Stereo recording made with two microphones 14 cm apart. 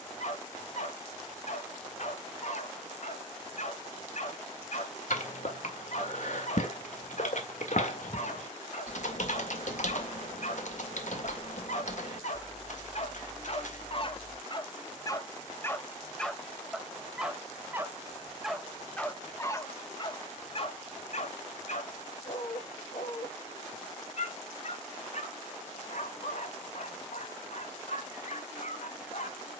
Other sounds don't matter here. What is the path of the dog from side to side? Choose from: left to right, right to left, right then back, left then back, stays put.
right then back.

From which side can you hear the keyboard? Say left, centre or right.
left.